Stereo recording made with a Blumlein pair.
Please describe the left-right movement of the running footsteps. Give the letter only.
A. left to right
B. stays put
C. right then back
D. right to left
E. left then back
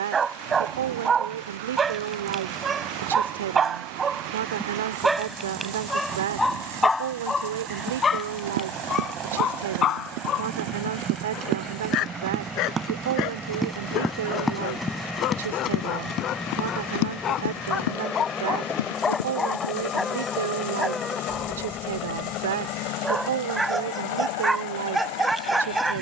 D.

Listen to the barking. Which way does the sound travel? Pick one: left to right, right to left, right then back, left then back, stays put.
left then back.